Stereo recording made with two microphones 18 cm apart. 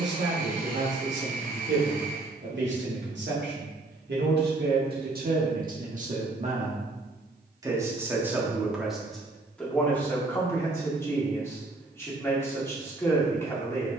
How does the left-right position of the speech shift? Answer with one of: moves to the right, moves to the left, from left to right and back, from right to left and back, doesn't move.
moves to the left.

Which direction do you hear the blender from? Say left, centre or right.
right.